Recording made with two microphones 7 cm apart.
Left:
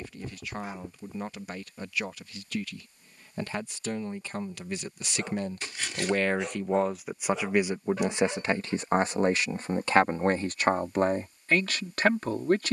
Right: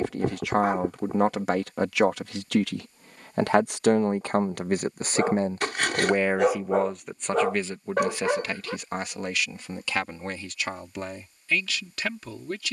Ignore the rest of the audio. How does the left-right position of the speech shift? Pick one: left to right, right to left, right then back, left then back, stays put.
right to left.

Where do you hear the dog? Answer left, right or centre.
right.